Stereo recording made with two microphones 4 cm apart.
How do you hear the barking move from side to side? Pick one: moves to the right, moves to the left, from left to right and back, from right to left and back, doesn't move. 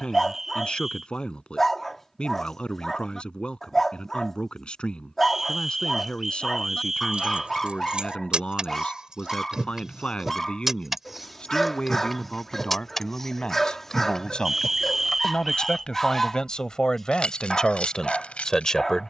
doesn't move.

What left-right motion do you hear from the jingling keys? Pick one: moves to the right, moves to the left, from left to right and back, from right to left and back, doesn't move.
moves to the left.